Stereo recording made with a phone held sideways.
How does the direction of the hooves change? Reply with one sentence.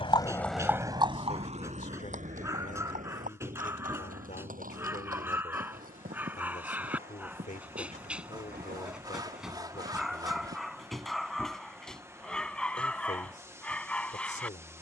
You can hear the hooves go from the left side to the right.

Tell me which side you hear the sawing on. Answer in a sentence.
In this clip you hear the sawing on the right.